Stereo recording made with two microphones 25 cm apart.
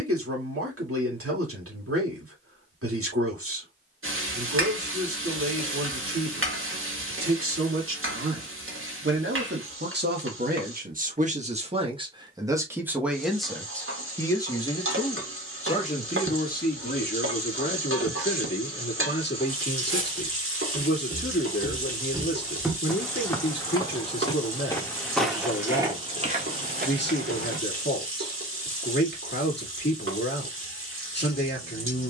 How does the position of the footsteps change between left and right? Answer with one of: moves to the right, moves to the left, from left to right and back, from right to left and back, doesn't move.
from right to left and back.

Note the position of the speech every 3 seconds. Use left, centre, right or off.
right, right, right, right, centre, left, left, left, left, left, left.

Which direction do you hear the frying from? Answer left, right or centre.
right.